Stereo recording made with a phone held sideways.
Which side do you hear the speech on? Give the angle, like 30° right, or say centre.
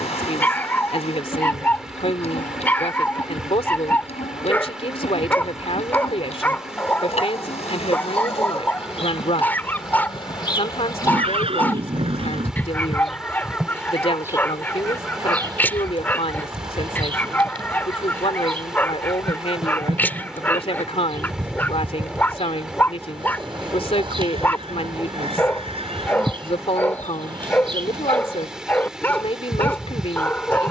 50° left.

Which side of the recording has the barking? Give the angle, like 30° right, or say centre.
10° left.